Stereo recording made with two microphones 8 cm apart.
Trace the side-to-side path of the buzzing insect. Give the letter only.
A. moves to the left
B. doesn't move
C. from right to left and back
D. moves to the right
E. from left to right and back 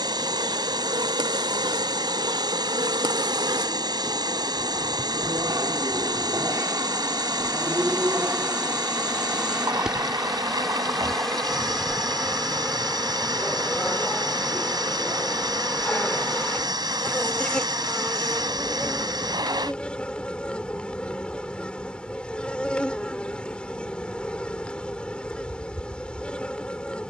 A.